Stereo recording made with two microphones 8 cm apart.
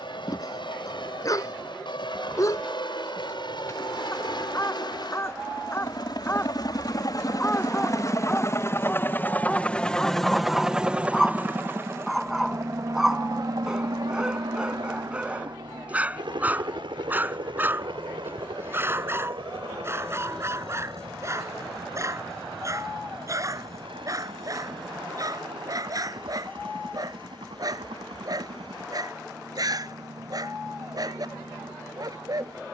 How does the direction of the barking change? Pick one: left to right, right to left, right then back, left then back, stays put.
left to right.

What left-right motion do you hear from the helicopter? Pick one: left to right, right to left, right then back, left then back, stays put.
left to right.